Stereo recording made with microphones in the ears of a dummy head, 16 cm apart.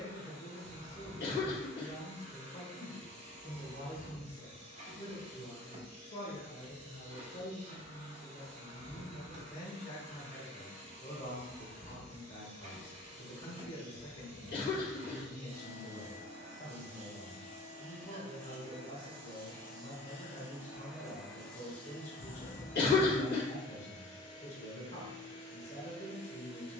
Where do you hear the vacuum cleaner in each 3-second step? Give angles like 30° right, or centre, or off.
40° right, 40° right, 40° right, 40° right, 40° right, 40° right, 20° right, 10° left, 30° left.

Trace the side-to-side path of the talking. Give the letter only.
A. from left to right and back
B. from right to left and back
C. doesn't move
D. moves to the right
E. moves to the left
C.